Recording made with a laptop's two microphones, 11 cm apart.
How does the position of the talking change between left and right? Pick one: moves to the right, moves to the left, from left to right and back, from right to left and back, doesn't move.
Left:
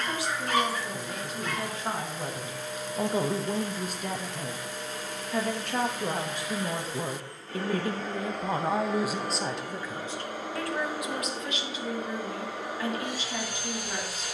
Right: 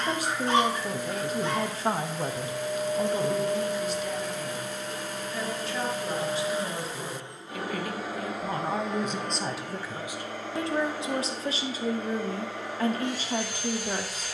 from right to left and back.